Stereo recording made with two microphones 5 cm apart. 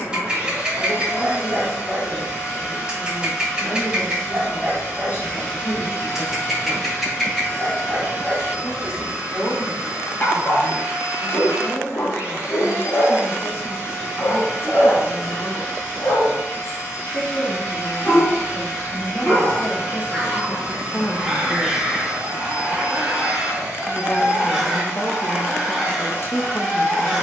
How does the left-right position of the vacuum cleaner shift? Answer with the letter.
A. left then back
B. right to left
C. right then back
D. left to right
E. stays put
E.